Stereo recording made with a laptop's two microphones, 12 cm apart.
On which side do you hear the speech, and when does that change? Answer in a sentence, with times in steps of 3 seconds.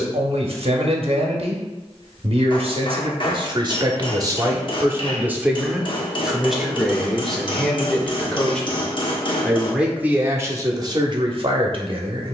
In this clip you hear the speech on the right from 0 s, in the centre from 6 s and on the right from 9 s.